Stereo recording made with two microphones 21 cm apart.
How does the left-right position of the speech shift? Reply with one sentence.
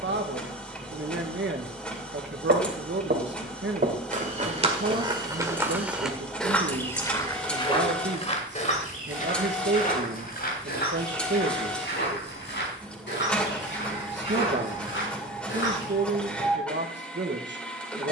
You can hear the speech stay put.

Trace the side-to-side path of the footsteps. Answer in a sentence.
In this clip you hear the footsteps move from right to left.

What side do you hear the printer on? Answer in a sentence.
You can hear the printer in the centre.